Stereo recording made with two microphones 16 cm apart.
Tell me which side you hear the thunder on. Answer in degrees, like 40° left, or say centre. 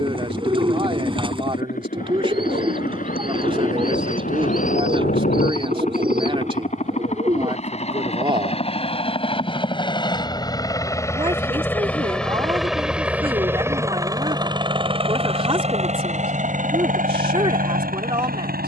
80° left.